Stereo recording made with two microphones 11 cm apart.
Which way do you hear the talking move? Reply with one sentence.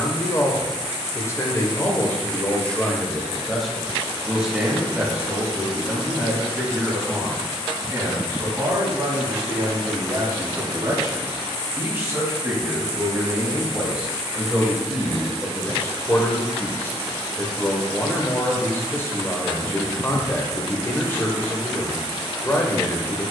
You can hear the talking move from left to right and back again.